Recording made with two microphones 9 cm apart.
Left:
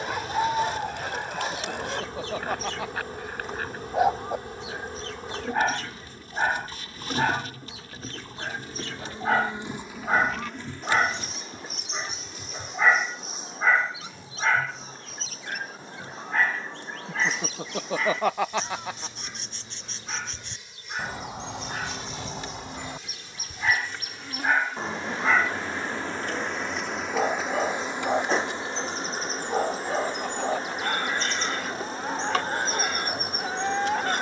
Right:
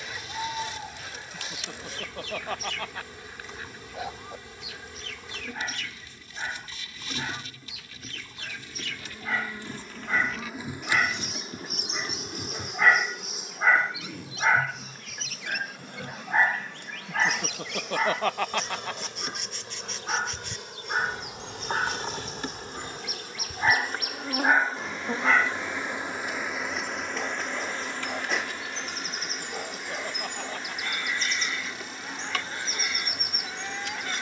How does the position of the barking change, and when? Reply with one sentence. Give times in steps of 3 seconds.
You can hear the barking on the left from 0 s, in the centre from 12 s, on the right from 15 s, in the centre from 24 s and on the left from 27 s.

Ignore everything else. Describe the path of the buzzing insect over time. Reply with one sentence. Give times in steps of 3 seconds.
You can hear the buzzing insect on the left from 0 s, in the centre from 9 s, on the right from 12 s and on the left from 27 s.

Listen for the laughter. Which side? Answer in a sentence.
You can hear the laughter in the centre.